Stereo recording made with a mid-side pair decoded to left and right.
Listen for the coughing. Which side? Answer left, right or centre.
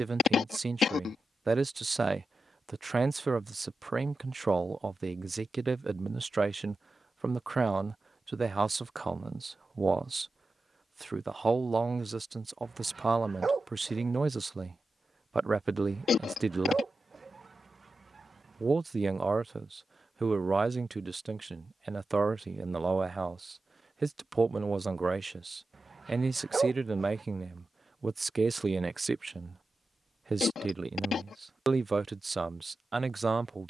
left.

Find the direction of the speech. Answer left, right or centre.
right.